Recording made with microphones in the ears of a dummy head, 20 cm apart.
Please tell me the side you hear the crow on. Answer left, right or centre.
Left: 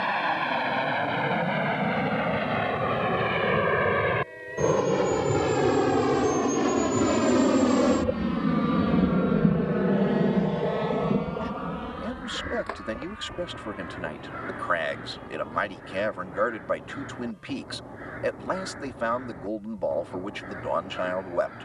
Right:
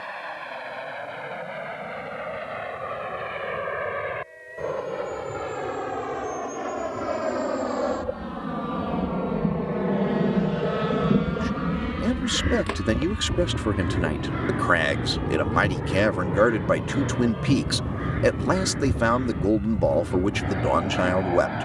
right.